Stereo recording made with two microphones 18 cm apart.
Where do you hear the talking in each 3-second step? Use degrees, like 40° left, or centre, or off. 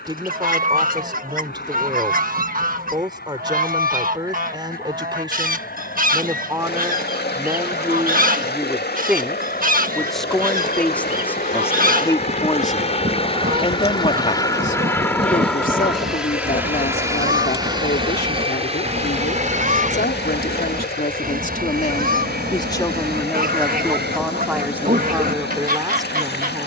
20° right, 20° right, 10° right, 10° left, 30° left, 60° left, 70° left, 30° left, 10° right.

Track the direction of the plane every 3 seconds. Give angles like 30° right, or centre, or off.
80° left, 70° left, 70° left, 60° left, 30° left, 10° right, 40° right, 50° right, 60° right.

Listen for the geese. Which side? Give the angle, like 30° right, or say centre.
50° right.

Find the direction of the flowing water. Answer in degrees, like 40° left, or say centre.
70° left.